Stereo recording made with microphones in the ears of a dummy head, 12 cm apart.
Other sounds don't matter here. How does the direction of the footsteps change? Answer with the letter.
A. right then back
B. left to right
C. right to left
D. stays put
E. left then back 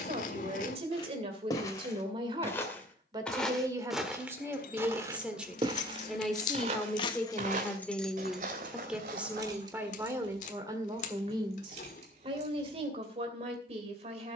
B.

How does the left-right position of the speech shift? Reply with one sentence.
In this clip you hear the speech go left and come back.